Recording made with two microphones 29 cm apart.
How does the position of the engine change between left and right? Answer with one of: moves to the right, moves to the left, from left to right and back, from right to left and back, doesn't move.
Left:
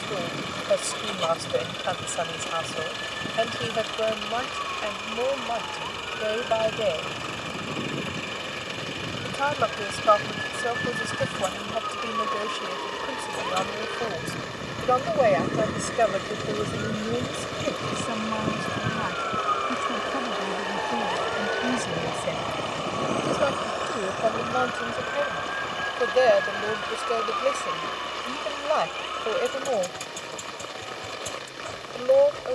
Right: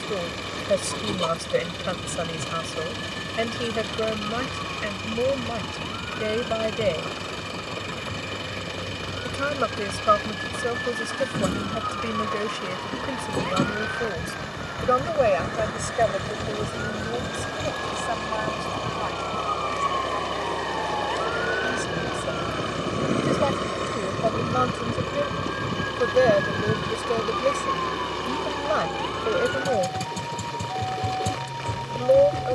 doesn't move.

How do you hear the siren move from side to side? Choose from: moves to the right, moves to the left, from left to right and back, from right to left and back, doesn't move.
moves to the right.